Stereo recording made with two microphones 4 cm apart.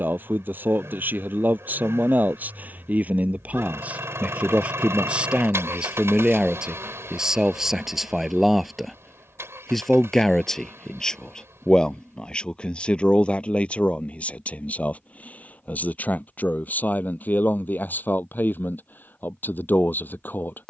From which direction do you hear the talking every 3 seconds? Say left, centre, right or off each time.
right, right, centre, centre, left, left, left.